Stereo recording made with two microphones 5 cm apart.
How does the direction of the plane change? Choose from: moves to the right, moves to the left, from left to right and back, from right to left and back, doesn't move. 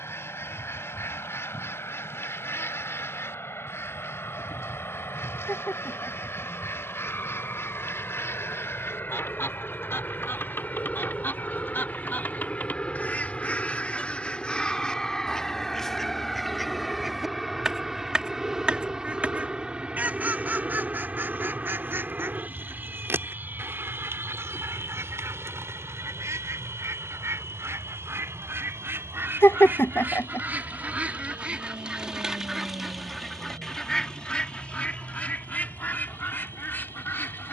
moves to the right.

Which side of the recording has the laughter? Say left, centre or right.
left.